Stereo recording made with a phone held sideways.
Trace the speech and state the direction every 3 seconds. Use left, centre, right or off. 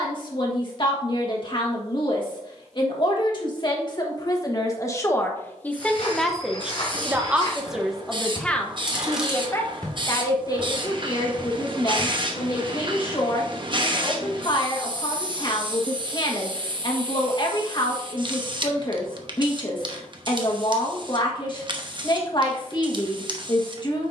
left, left, centre, left, left, left, left, left.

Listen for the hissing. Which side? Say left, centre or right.
right.